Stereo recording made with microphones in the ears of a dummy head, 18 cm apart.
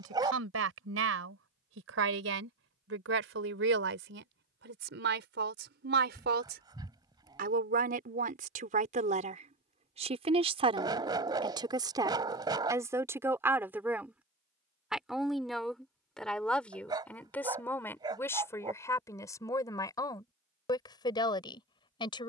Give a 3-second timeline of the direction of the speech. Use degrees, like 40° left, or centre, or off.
70° right, 60° right, 50° right, 30° right, 10° right, 10° left, 20° left, 20° left.